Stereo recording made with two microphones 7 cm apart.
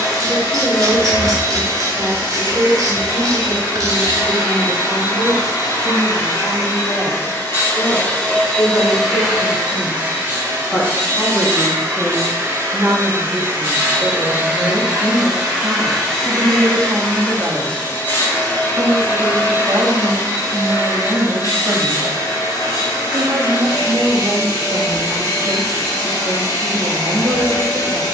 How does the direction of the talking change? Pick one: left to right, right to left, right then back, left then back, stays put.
left to right.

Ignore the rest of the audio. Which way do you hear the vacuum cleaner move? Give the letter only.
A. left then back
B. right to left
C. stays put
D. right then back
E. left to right
D.